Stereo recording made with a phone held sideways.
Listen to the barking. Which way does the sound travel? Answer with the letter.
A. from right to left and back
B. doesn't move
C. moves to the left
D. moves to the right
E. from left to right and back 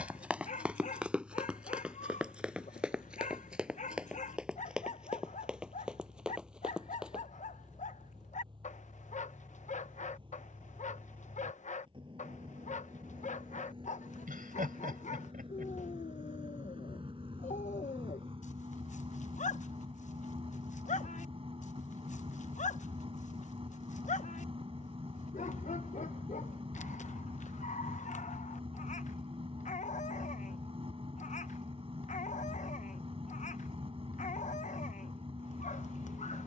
B.